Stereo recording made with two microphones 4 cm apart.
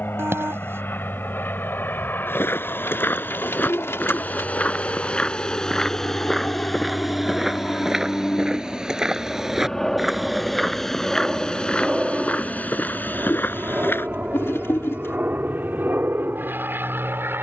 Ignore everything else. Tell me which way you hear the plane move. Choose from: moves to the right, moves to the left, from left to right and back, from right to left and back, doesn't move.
moves to the right.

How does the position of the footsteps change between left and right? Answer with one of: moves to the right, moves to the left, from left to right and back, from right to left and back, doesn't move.
from left to right and back.